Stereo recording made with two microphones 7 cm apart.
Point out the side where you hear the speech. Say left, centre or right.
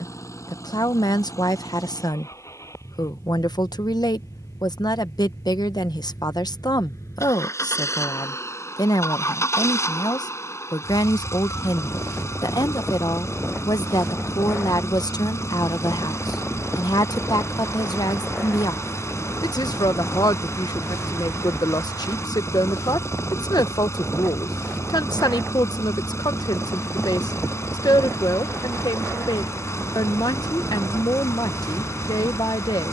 left.